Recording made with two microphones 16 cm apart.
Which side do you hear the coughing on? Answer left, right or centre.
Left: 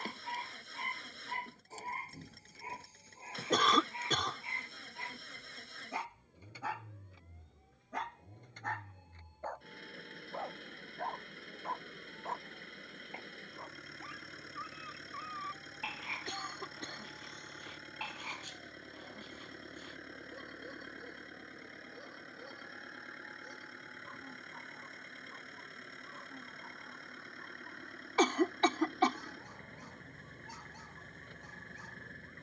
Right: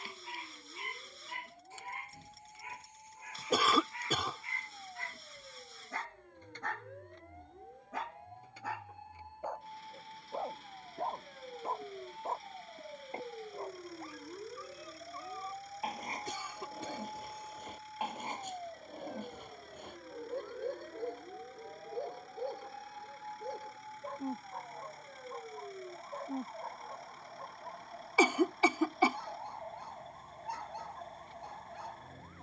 centre.